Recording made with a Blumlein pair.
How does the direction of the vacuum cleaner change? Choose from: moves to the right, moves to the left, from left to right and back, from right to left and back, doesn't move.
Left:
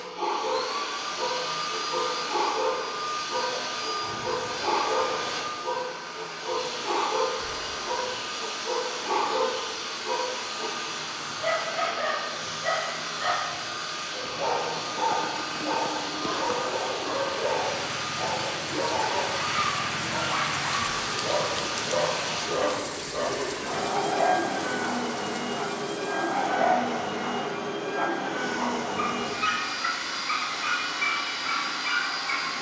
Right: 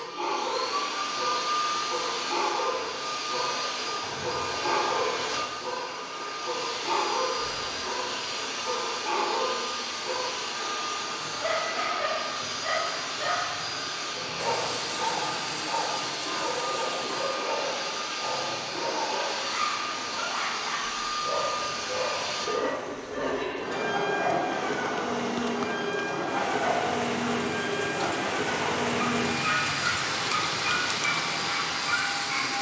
doesn't move.